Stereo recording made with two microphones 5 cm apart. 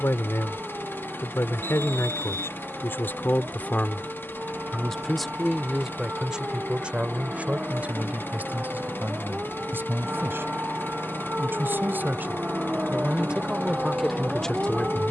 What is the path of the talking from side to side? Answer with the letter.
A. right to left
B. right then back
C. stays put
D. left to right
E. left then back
B.